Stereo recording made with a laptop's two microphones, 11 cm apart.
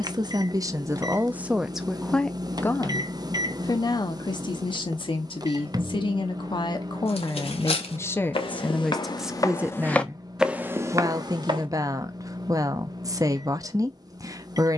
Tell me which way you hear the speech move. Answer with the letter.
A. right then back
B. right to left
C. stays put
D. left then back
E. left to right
D.